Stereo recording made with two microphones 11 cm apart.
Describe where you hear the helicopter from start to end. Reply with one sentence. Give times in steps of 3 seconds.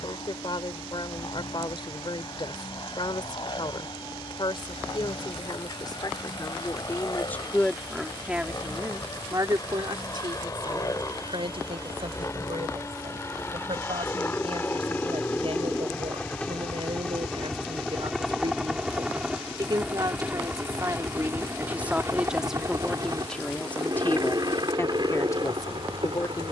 In this clip you hear the helicopter on the left from 0 s, in the centre from 15 s and on the right from 21 s.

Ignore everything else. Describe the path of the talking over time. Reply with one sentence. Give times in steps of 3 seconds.
You can hear the talking on the left from 0 s, in the centre from 6 s, on the right from 9 s, in the centre from 21 s and on the left from 24 s.